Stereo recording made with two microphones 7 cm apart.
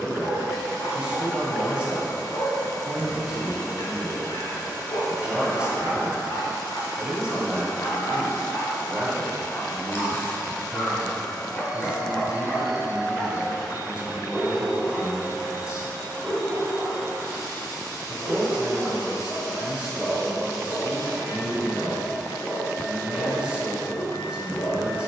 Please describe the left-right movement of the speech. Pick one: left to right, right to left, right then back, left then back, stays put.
stays put.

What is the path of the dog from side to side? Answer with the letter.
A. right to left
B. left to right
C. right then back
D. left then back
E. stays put
C.